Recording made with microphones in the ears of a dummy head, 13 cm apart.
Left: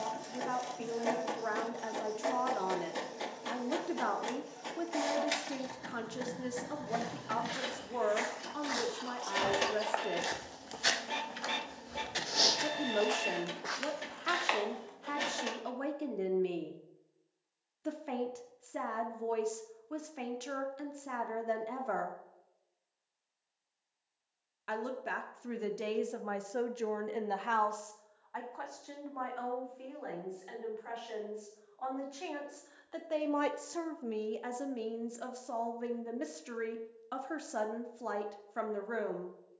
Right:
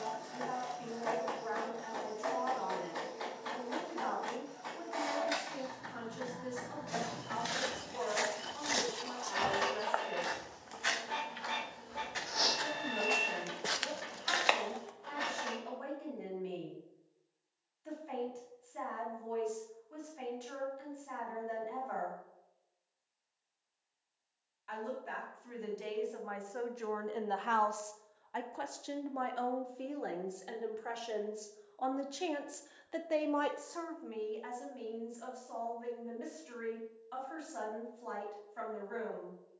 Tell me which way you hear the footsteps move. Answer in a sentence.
In this clip you hear the footsteps go left and come back.